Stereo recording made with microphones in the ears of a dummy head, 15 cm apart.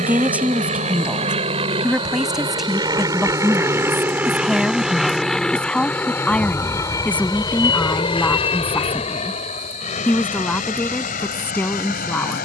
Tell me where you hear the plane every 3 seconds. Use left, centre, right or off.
right, centre, left, left.